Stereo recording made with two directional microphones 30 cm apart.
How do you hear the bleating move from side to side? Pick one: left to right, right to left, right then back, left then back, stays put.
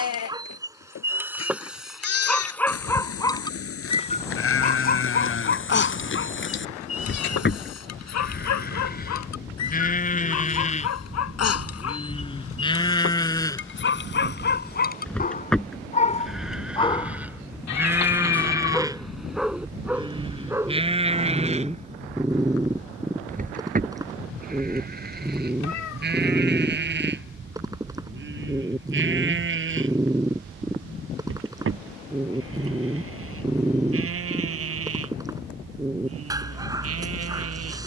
left to right.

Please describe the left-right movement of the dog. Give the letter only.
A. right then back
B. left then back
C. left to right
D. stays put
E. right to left
B.